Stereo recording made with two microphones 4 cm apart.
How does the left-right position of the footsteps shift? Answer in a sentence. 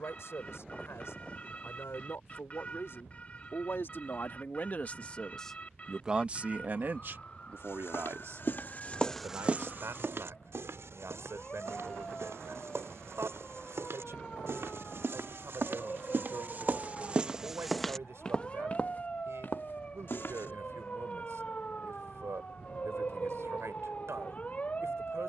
You can hear the footsteps move from left to right and back again.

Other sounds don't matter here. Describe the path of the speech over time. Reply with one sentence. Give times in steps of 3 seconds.
In this clip you hear the speech on the left from 0 s and on the right from 6 s.